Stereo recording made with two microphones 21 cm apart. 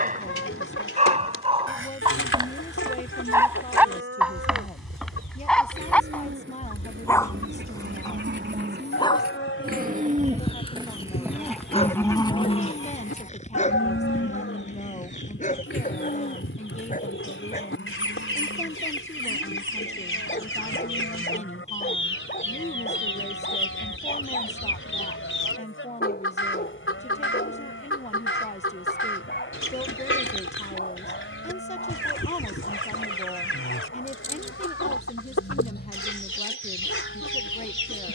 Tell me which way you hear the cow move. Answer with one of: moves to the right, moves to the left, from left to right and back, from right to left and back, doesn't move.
moves to the left.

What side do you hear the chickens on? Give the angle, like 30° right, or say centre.
80° left.